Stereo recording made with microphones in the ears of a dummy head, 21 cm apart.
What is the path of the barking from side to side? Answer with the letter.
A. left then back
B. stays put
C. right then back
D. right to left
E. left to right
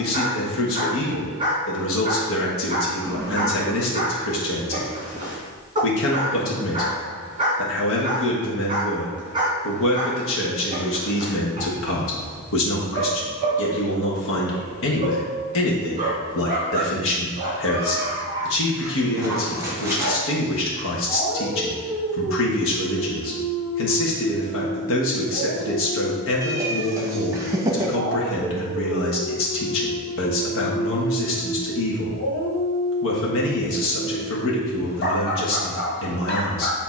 D.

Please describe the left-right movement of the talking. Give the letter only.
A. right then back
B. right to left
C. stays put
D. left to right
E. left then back
C.